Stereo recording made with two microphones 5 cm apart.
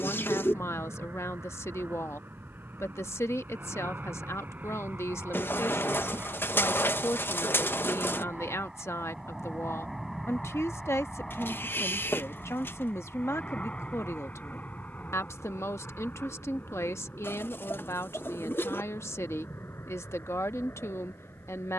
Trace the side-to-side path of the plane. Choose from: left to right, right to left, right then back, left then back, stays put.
right to left.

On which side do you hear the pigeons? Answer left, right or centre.
left.